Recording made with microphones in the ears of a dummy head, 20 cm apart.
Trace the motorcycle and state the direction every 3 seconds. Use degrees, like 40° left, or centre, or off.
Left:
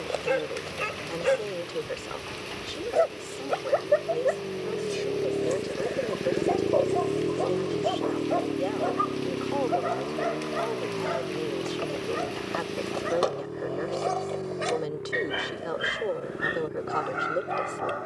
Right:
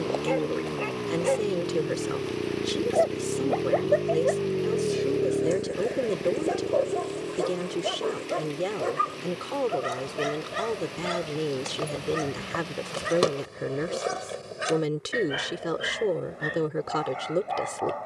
70° right, 30° right, 40° left, 60° left, 70° left, 70° left.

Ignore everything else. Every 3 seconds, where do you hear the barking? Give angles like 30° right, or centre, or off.
20° left, centre, 30° right, 50° right, 30° right, 10° left.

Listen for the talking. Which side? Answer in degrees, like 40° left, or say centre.
40° right.